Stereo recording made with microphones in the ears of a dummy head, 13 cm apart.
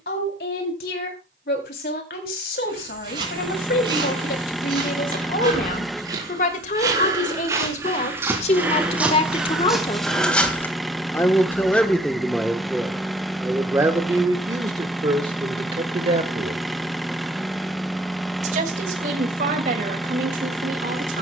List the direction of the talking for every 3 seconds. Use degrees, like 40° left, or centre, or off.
70° left, 70° left, 50° left, 30° left, 10° right, 30° right, 50° right.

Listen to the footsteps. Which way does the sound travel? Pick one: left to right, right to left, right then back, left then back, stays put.
right to left.